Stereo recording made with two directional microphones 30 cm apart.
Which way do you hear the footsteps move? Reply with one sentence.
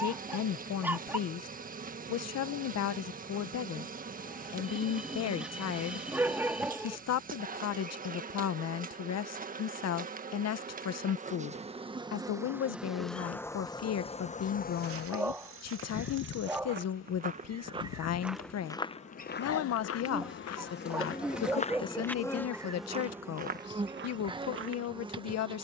In this clip you hear the footsteps move from right to left and back again.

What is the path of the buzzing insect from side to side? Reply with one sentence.
You can hear the buzzing insect go left and come back.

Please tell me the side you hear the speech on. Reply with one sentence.
You can hear the speech on the left.